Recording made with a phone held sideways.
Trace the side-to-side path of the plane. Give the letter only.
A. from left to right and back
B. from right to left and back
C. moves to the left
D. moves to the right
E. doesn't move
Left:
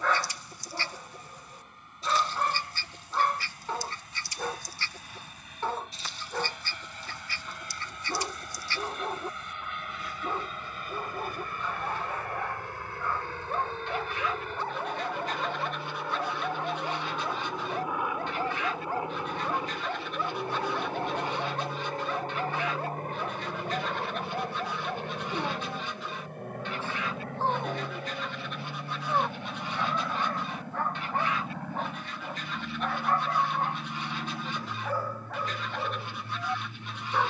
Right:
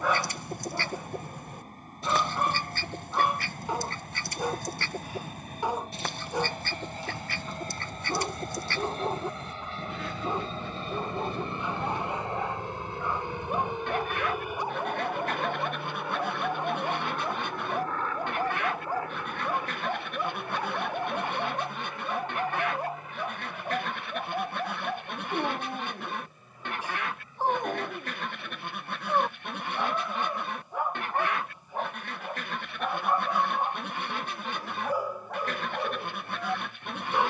C.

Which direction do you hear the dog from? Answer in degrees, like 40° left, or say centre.
10° right.